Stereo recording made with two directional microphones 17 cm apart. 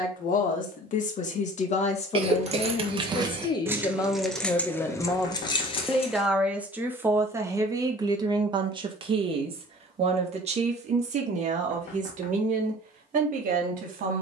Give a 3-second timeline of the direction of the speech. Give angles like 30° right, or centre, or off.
40° left, 20° left, 20° right, 40° right, 50° right.